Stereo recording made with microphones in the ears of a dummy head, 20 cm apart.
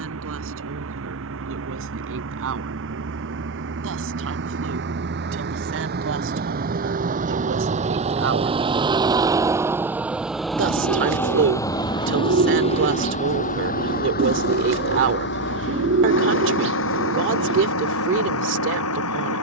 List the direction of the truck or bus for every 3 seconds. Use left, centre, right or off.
right, right, right, centre, left, left, left.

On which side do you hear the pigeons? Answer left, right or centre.
right.